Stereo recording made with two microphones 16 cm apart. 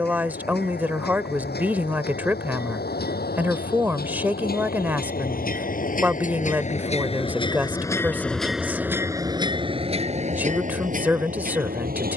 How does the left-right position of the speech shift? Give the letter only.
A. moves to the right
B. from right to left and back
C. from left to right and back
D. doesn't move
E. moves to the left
D.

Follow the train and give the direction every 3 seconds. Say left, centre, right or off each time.
left, left, left, right.